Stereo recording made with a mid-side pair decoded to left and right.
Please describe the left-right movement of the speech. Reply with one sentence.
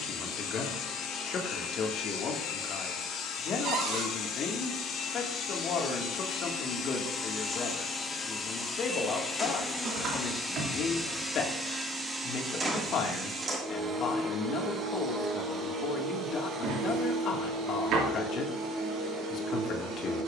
In this clip you hear the speech stay put.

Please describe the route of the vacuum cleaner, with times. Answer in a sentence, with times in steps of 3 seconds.
You can hear the vacuum cleaner on the left from 0 s, in the centre from 9 s and on the right from 12 s.